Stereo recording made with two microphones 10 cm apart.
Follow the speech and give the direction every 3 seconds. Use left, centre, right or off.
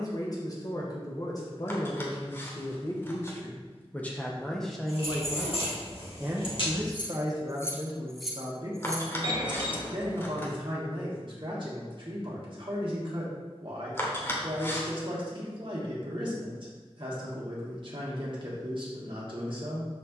left, centre, right, right, right, right, right.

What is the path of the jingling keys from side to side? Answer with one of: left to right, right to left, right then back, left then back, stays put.
left to right.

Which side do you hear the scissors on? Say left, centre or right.
left.